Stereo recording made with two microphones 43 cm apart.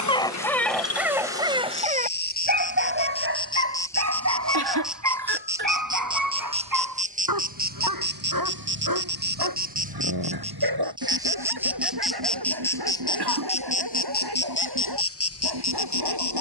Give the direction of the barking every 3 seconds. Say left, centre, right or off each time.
centre, right, right, right, right, right.